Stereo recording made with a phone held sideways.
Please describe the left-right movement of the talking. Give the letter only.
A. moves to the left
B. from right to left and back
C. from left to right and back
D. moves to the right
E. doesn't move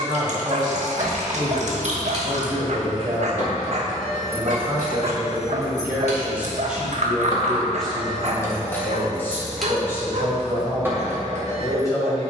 A.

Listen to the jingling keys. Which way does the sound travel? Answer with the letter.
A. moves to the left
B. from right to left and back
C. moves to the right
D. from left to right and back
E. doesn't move
B.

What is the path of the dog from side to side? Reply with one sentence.
You can hear the dog stay in one place.